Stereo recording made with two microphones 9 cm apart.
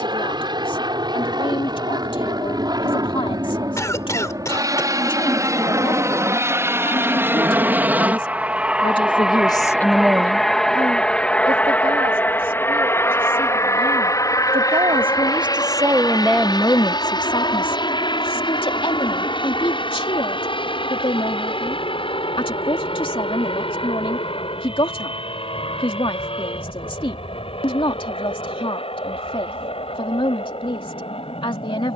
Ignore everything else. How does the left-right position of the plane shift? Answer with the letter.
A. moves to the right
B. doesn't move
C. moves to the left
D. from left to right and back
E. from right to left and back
C.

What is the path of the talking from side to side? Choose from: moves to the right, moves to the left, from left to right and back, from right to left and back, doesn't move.
from left to right and back.